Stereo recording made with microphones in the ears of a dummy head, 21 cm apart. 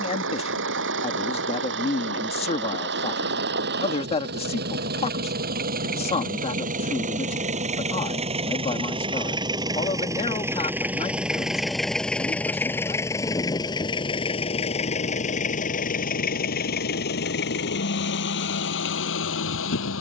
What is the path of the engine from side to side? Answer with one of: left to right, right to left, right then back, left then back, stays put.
right to left.